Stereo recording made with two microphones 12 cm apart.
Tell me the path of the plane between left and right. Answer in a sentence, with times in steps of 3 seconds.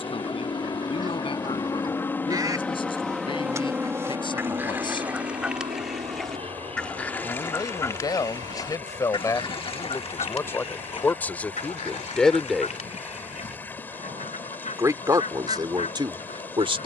You can hear the plane on the left from 0 s and on the right from 3 s.